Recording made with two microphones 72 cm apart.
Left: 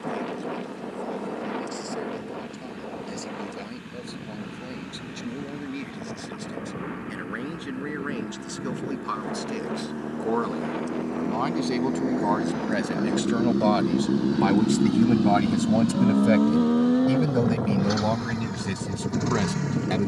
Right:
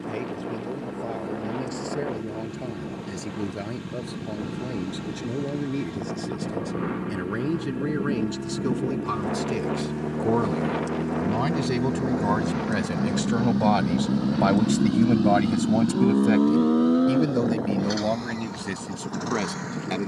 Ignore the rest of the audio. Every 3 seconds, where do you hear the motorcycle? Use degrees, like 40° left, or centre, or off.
70° right, 70° right, 60° right, 50° right, 20° right, 20° left, 50° left.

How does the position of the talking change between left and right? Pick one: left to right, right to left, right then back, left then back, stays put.
right to left.